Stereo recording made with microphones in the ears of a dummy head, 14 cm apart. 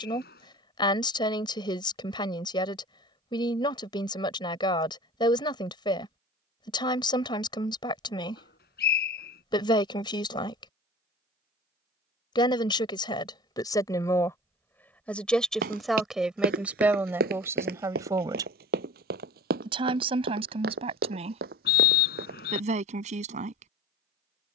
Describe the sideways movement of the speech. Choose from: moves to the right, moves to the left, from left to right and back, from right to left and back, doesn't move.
moves to the right.